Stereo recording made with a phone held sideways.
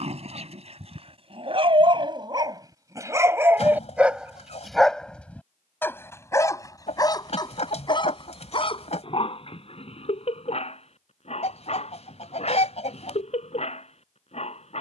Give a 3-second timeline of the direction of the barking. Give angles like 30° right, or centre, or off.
40° right, centre, 30° left, 50° left, 50° left.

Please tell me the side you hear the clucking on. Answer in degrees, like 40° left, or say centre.
50° left.